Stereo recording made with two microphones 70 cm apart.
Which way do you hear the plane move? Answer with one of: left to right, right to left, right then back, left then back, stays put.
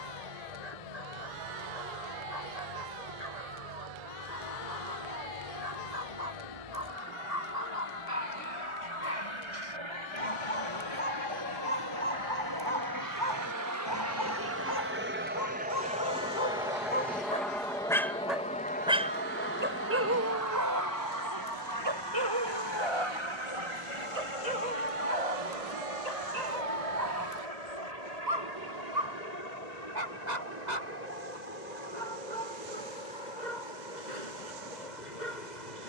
right to left.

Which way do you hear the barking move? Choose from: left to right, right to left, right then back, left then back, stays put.
left to right.